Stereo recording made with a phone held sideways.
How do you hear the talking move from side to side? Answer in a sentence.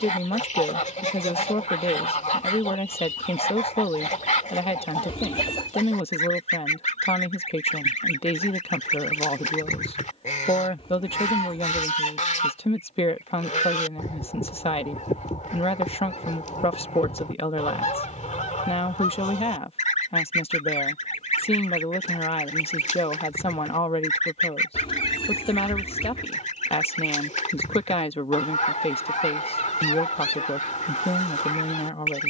You can hear the talking stay put.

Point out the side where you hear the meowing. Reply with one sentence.
You can hear the meowing on the left.